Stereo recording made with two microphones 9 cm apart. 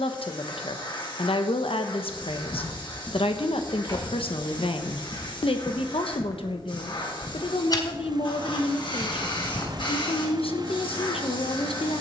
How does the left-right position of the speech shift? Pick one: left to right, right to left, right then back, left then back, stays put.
stays put.